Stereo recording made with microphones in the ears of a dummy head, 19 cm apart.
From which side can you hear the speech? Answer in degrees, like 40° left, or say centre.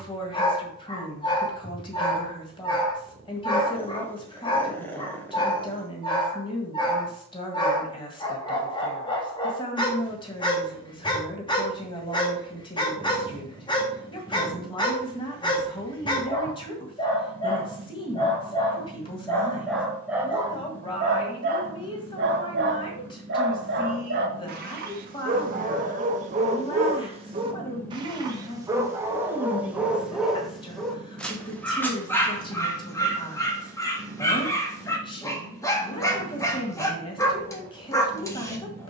20° left.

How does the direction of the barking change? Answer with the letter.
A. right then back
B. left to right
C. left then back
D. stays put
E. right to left
A.